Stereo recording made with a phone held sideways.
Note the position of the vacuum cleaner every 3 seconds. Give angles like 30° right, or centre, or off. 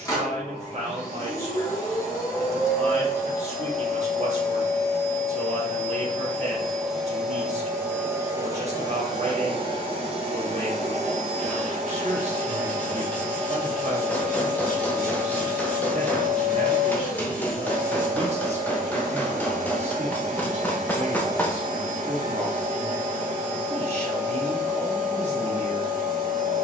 20° left, 20° left, 10° right, 40° right, 60° right, 60° right, 60° right, 60° right, 60° right.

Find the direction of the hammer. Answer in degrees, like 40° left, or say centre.
10° left.